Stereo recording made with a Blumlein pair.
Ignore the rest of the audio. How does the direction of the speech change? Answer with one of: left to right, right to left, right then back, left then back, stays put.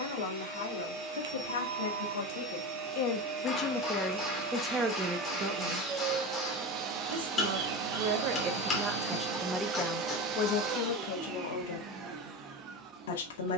right then back.